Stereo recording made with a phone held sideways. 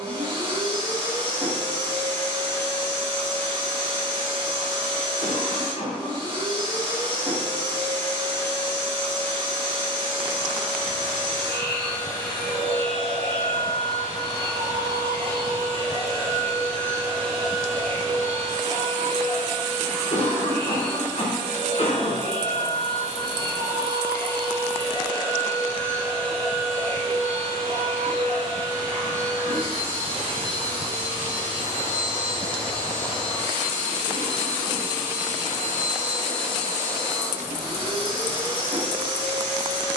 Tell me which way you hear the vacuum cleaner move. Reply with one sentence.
In this clip you hear the vacuum cleaner stay in one place.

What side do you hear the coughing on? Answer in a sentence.
You can hear the coughing on the left.